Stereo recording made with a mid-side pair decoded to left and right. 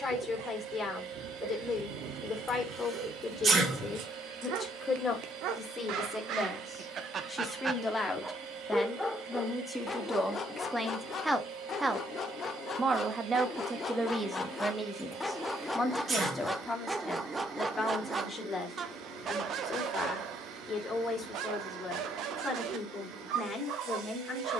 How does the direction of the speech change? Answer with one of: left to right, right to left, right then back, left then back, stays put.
right then back.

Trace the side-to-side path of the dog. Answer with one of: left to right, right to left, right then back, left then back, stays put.
left then back.